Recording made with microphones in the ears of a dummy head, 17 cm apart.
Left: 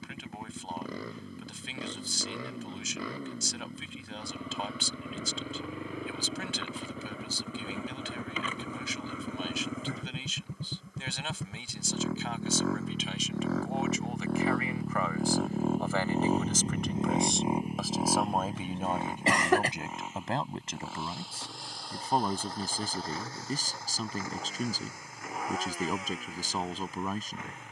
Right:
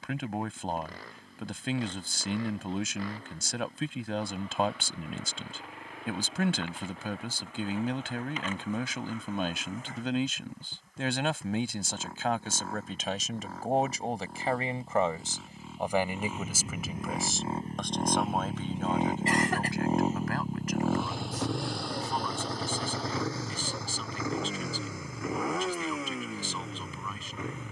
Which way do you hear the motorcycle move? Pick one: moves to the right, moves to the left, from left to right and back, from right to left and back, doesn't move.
moves to the right.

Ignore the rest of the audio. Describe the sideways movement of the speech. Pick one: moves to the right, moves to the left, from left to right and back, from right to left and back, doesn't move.
moves to the left.